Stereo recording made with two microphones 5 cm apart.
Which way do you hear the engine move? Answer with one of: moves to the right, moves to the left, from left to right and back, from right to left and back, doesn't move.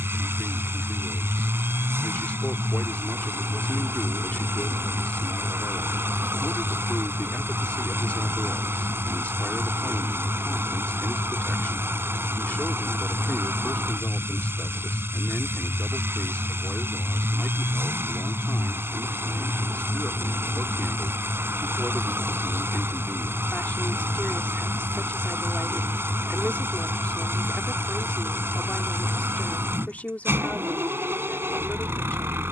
doesn't move.